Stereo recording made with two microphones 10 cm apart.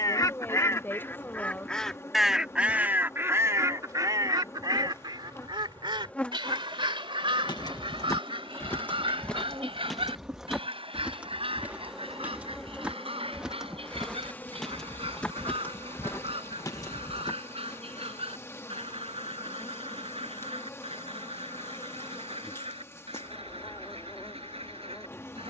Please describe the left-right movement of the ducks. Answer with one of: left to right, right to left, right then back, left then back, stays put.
left to right.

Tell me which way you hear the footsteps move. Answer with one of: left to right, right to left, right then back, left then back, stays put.
right then back.